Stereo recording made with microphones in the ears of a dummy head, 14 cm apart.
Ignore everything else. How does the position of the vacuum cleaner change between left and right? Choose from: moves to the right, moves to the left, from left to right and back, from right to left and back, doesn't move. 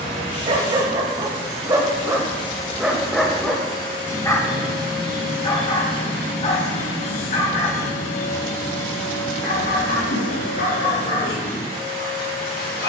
doesn't move.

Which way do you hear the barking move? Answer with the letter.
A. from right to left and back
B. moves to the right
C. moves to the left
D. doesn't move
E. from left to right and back
C.